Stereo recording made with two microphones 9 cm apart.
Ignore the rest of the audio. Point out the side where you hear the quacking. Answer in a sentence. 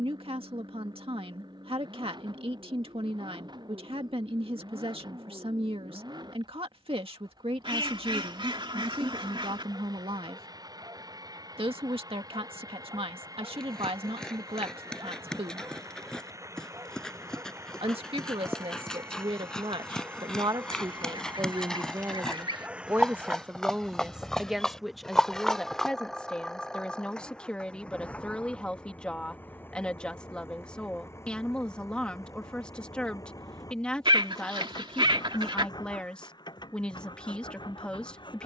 You can hear the quacking on the right.